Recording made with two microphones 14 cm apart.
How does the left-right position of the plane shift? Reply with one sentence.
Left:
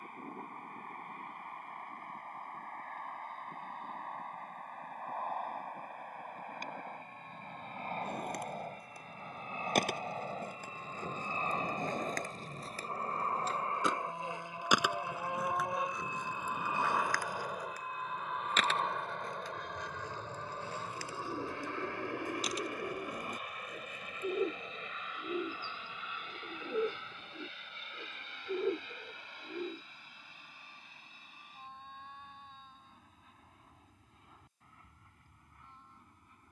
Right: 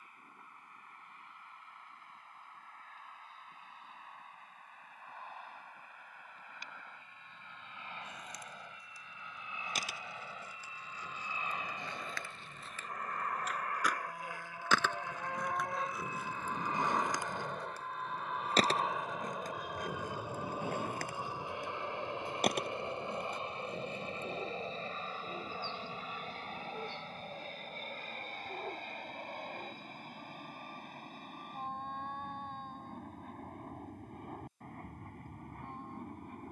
In this clip you hear the plane go from the left side to the right.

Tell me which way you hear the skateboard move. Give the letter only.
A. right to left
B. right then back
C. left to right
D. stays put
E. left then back
C.